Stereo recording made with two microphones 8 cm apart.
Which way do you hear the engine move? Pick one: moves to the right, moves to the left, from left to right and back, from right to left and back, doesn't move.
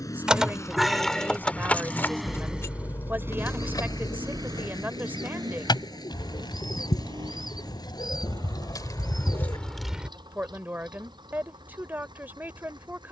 moves to the right.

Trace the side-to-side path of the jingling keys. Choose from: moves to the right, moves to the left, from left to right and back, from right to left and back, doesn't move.
from right to left and back.